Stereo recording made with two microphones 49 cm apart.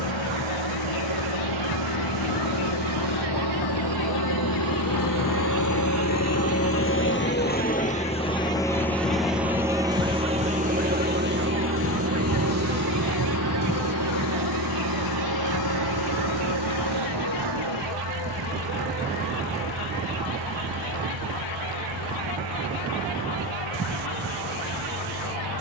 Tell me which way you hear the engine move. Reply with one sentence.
You can hear the engine move to the right.